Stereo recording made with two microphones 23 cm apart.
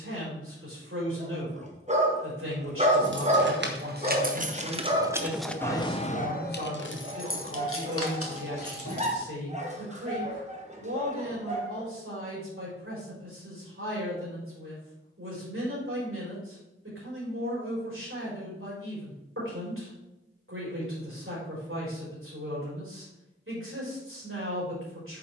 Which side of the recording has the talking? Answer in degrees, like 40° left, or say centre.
70° right.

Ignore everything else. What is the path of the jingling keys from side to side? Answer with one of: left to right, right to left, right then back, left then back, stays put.
right to left.